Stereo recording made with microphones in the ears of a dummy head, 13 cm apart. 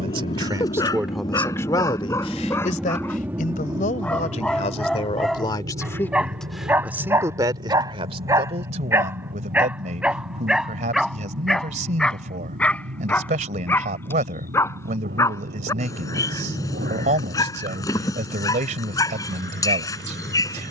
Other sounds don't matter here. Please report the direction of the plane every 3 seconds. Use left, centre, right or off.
left, right, right, right, right, right, right.